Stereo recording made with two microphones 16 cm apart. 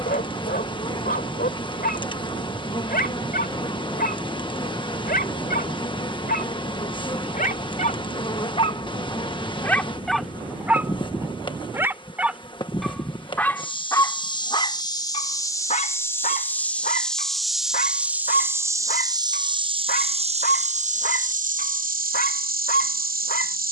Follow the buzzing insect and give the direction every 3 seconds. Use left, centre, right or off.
left, left, left, left, left, centre, right, right.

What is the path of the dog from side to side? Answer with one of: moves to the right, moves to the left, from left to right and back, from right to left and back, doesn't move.
from left to right and back.